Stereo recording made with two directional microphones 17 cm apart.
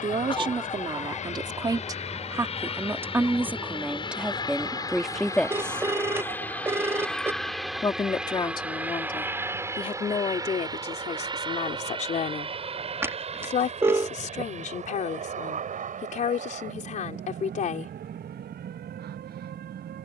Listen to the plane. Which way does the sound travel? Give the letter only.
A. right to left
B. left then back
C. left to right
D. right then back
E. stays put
C.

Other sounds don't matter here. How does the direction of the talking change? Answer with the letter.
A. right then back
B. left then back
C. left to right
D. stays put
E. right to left
E.